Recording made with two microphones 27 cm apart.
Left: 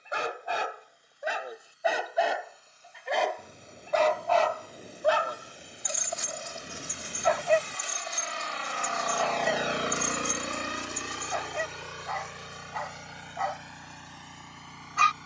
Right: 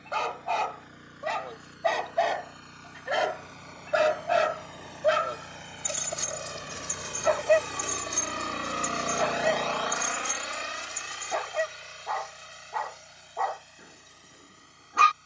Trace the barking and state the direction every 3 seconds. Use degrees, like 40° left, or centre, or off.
10° left, 20° right, 50° right, 70° right, 70° right.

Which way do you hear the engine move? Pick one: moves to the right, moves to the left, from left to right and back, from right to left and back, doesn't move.
moves to the left.